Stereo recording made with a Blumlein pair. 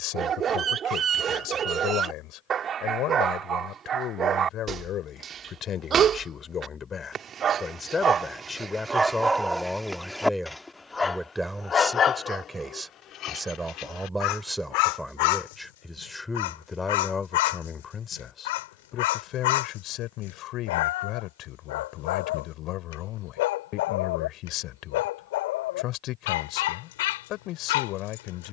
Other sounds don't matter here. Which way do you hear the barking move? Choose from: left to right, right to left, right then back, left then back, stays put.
right to left.